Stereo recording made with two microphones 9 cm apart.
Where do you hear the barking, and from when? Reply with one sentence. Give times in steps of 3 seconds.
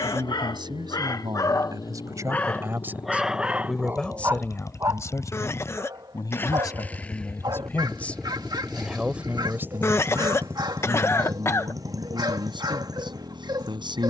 In this clip you hear the barking on the left from 0 s and on the right from 3 s.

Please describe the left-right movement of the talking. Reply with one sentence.
In this clip you hear the talking go left and come back.